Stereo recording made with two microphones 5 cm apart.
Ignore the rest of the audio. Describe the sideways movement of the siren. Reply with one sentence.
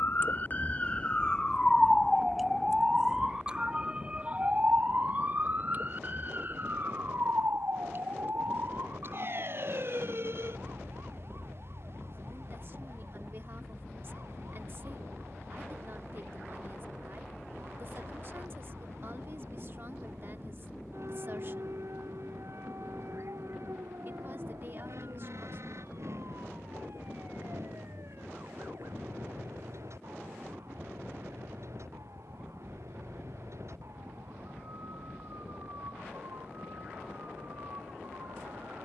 You can hear the siren move from left to right.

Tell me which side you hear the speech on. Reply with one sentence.
You can hear the speech on the right.